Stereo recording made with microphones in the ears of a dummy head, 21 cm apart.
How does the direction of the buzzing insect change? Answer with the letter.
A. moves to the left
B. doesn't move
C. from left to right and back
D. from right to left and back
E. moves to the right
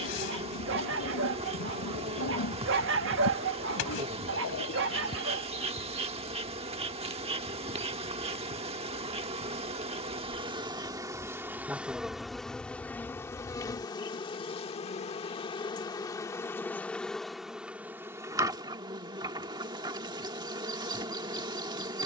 D.